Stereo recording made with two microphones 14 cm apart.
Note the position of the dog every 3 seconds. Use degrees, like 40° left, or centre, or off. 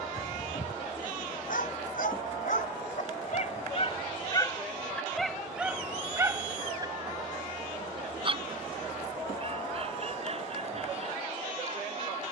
80° left, 20° left, 30° right, 50° right.